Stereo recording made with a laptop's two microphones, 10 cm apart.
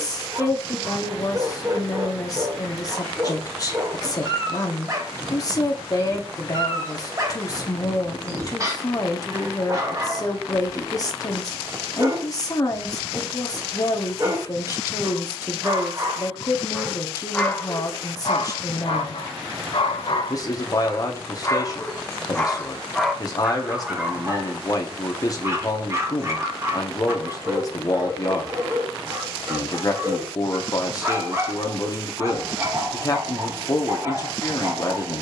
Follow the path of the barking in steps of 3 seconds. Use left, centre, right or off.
right, right, right, right, right, centre, left, centre, right, right, right, right.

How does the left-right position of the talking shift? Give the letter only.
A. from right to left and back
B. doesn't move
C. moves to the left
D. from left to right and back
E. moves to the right
B.